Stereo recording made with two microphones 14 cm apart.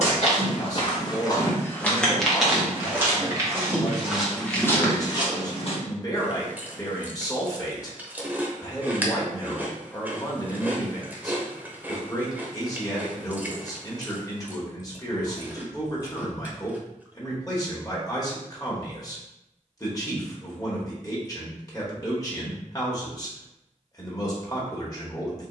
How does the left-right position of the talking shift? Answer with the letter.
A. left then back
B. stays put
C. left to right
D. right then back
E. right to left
B.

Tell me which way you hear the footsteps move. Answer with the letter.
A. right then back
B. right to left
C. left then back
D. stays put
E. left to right
A.